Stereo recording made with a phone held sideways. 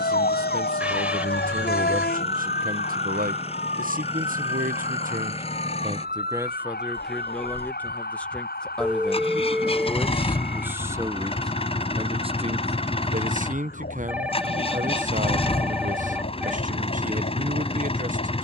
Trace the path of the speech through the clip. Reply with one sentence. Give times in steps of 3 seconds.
You can hear the speech on the right from 0 s, in the centre from 6 s and on the right from 12 s.